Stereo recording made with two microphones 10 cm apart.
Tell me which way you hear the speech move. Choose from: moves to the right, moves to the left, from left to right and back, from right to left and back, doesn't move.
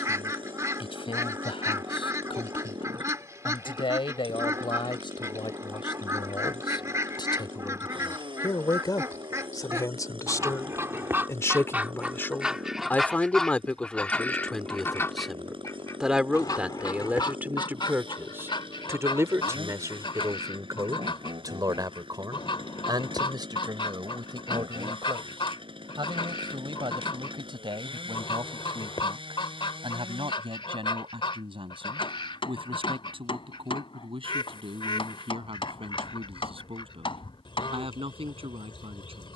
moves to the right.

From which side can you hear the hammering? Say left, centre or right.
left.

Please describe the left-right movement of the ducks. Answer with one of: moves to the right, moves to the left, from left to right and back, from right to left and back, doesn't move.
moves to the left.